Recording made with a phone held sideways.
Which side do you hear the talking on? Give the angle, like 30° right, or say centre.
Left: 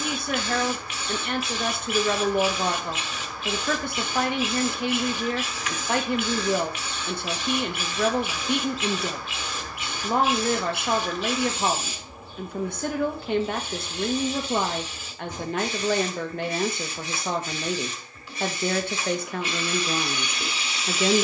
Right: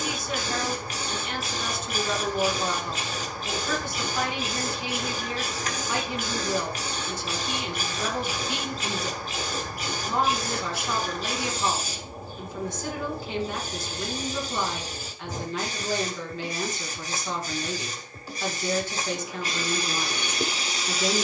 60° left.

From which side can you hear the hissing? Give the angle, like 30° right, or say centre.
40° right.